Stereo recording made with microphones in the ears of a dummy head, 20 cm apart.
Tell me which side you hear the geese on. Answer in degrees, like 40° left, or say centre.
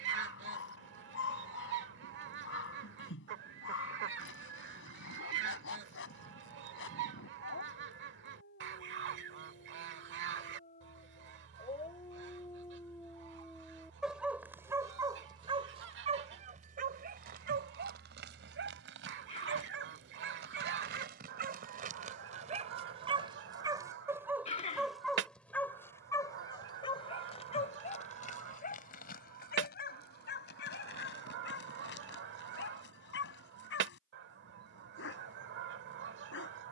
50° right.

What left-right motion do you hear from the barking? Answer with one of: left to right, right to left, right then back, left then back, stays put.
right then back.